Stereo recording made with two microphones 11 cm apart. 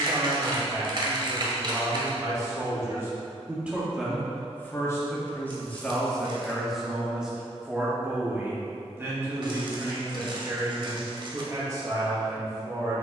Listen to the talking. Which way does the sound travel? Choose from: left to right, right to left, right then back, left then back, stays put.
left then back.